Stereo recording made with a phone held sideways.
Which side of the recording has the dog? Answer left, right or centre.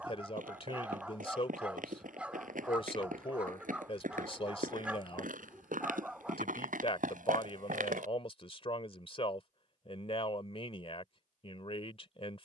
centre.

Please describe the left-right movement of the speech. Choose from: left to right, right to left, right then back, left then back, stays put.
stays put.